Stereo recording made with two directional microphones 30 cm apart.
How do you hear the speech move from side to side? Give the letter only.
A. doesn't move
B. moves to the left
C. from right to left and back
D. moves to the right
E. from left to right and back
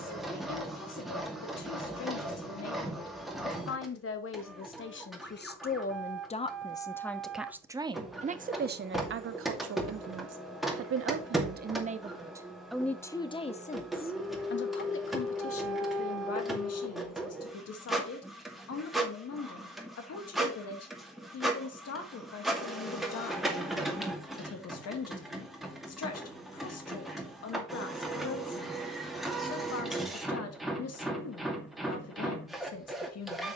E.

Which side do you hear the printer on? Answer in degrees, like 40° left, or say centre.
centre.